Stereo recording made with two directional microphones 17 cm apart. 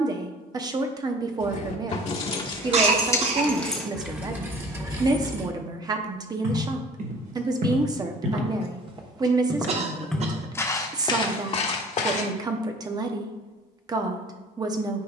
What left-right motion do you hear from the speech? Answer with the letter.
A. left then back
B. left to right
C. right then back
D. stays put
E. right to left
D.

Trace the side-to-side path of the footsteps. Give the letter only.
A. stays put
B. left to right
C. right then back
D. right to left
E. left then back
D.